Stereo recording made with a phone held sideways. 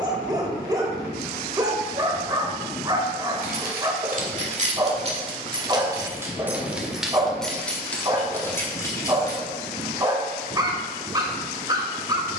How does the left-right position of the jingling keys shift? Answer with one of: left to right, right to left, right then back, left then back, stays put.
right to left.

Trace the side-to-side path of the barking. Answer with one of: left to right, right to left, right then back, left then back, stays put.
stays put.